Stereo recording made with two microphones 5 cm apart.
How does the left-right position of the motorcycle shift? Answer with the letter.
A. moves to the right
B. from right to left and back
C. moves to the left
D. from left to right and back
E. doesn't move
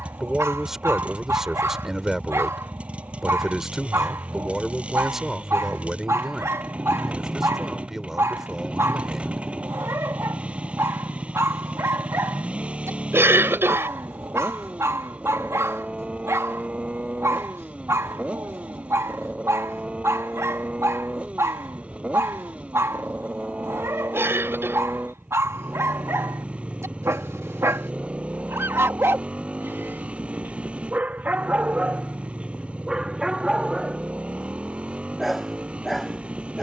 E.